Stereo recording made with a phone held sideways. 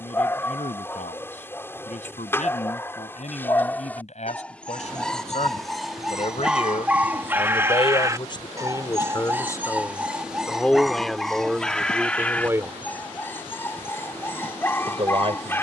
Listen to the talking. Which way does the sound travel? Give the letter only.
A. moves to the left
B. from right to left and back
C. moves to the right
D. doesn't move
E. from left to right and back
C.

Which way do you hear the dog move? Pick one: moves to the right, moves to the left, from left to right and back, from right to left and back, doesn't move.
from left to right and back.